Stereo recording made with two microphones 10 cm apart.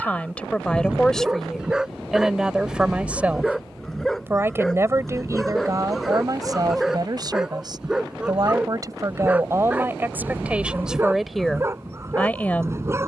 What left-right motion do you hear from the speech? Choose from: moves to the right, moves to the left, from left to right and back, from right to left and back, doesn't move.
from left to right and back.